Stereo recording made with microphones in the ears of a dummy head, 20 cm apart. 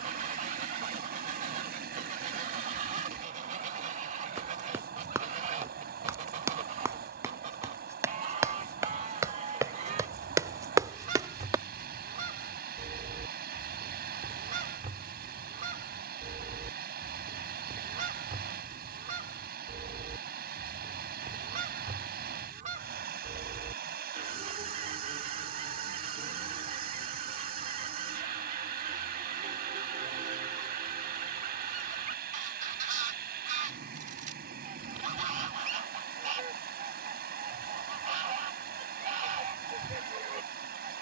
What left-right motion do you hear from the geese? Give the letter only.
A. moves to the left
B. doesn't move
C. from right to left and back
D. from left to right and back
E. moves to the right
B.